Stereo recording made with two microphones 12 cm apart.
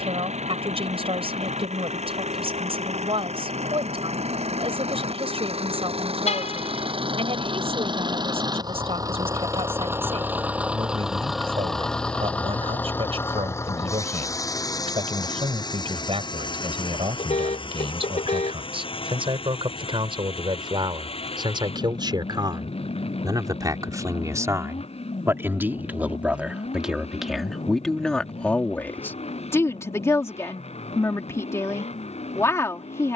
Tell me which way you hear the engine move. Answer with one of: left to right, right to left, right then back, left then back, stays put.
right to left.